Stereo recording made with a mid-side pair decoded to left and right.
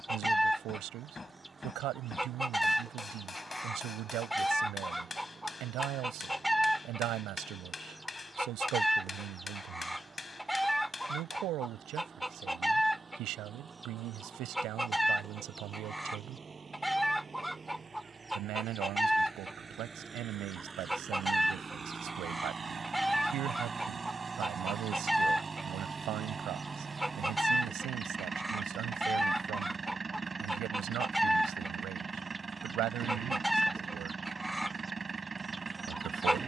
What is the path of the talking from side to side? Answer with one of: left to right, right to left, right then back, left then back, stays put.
stays put.